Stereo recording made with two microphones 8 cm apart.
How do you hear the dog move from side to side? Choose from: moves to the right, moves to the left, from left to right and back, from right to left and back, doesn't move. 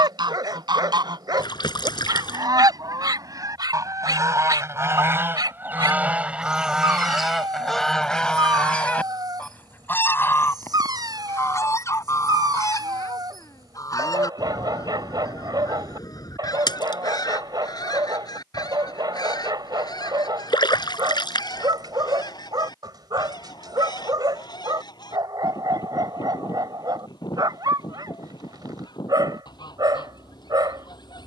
doesn't move.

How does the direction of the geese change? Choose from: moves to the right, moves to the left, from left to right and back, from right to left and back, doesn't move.
moves to the left.